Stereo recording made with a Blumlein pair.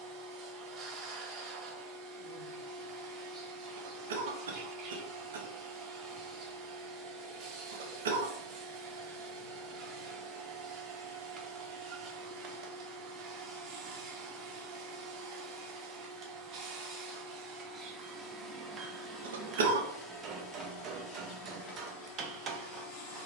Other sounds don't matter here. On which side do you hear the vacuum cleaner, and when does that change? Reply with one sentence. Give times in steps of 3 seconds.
In this clip you hear the vacuum cleaner on the right from 0 s, in the centre from 18 s and on the left from 21 s.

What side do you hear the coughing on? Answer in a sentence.
You can hear the coughing on the right.